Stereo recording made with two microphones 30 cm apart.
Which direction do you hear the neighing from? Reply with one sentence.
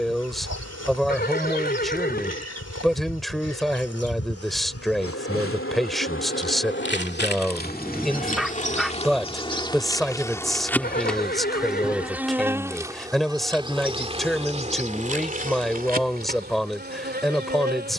In this clip you hear the neighing on the left.